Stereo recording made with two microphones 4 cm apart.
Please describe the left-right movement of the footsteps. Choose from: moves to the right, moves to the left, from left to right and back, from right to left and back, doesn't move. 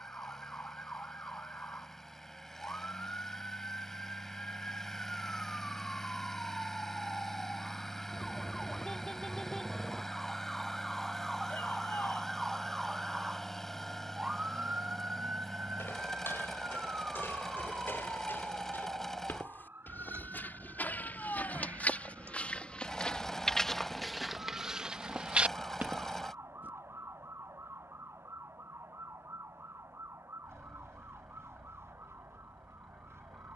moves to the right.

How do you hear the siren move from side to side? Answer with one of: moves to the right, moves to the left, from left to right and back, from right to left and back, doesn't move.
moves to the right.